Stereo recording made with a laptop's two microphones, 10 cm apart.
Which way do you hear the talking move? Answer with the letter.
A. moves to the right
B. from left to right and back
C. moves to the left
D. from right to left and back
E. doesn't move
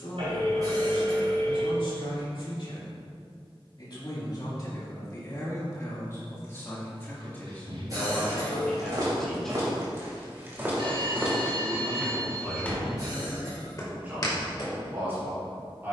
A.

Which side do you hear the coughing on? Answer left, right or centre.
right.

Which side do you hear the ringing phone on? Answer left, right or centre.
right.